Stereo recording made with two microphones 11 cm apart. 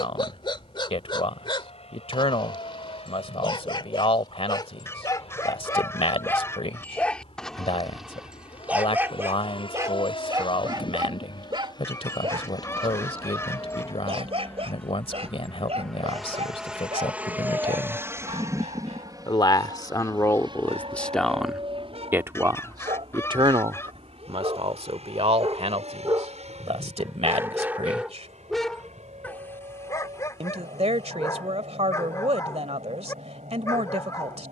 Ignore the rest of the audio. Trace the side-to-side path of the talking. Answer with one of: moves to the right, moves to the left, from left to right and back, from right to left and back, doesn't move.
moves to the right.